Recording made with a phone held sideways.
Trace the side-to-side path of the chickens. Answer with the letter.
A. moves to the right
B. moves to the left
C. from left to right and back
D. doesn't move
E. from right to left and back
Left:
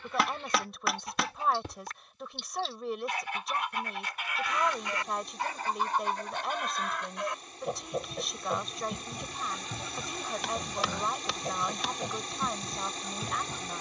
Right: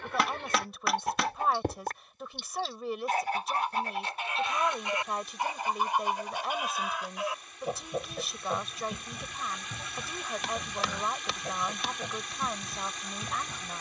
B.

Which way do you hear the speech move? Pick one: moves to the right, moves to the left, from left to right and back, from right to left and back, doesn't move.
doesn't move.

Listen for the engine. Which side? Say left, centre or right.
left.